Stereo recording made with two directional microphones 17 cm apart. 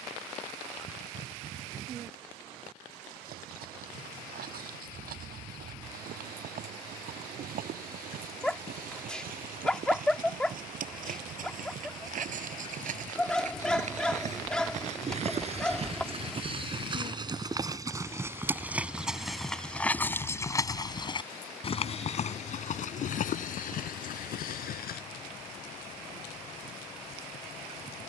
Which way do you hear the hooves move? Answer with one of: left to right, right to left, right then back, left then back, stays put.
right to left.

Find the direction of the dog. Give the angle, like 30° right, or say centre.
centre.